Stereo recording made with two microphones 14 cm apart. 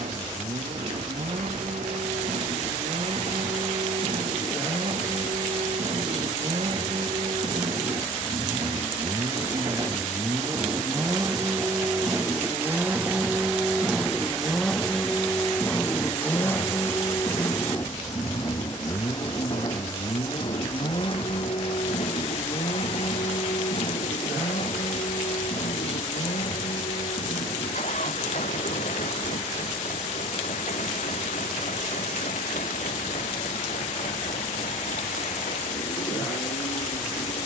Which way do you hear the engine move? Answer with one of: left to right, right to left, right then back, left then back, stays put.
right to left.